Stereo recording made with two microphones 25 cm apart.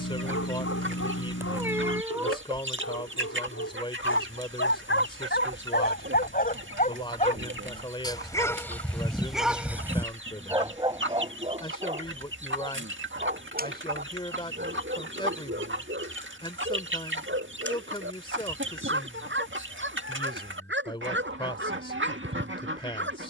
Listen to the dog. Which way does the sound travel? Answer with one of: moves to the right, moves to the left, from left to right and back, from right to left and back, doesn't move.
moves to the right.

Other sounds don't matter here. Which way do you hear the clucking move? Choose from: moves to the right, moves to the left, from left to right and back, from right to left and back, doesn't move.
doesn't move.